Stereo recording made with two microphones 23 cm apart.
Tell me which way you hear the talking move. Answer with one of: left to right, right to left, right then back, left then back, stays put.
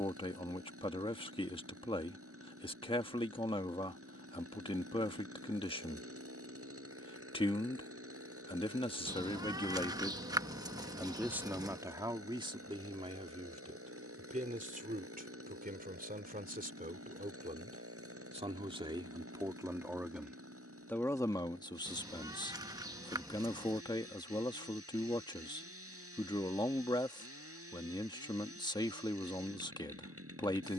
right then back.